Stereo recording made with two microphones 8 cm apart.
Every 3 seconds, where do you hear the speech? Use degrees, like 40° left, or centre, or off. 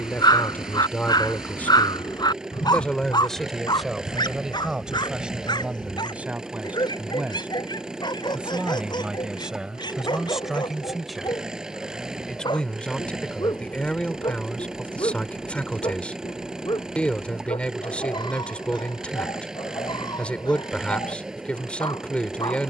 20° left, 10° right, 20° right, 10° right, 10° left, 10° left, 10° left, 10° left.